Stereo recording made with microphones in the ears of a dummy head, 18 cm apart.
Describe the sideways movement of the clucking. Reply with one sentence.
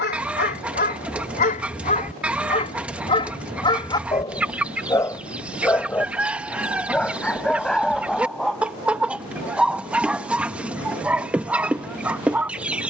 In this clip you hear the clucking stay in one place.